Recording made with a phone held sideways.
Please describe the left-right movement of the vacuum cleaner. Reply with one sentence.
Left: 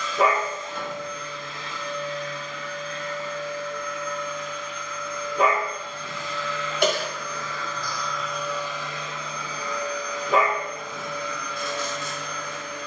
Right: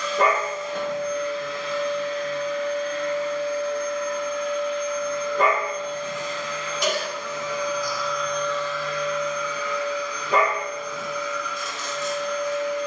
You can hear the vacuum cleaner travel towards the left.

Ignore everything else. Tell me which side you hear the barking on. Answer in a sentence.
In this clip you hear the barking in the centre.